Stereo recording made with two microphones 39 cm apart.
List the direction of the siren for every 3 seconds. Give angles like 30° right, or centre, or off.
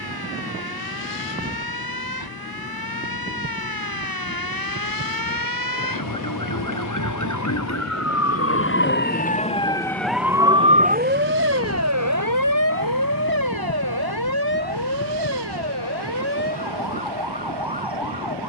70° left, 60° left, 50° left, 10° right, 60° right, 80° right.